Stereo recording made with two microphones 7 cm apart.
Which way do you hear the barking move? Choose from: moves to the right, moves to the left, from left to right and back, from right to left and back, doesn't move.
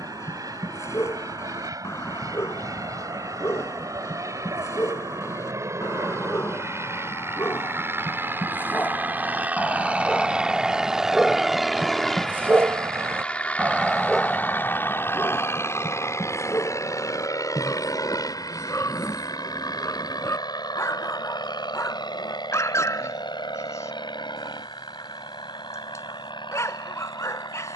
from left to right and back.